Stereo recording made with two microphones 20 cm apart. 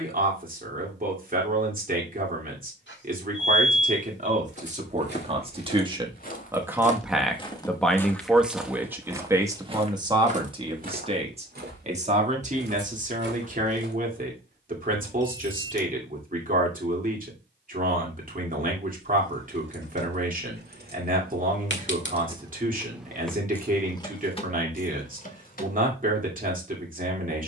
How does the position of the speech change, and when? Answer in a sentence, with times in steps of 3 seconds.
You can hear the speech on the right from 0 s, in the centre from 6 s and on the right from 9 s.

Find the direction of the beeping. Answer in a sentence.
You can hear the beeping on the left.